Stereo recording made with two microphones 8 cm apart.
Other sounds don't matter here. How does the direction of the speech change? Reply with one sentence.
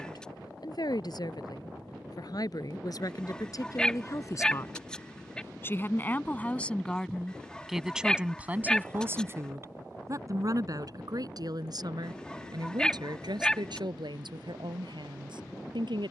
You can hear the speech move to the right.